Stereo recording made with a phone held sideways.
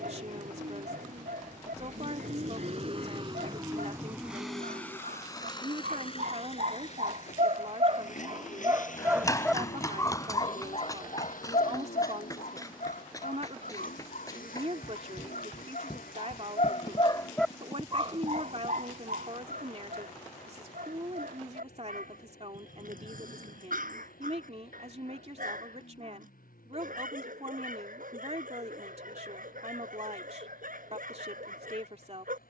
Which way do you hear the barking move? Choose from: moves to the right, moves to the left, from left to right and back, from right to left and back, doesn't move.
from right to left and back.